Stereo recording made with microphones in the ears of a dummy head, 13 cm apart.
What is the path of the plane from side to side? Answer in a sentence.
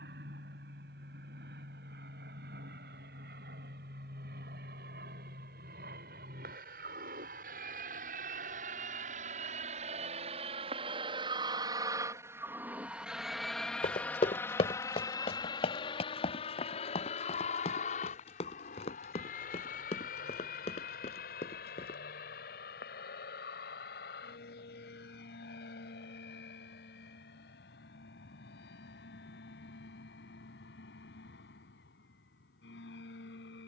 In this clip you hear the plane go from the right side to the left.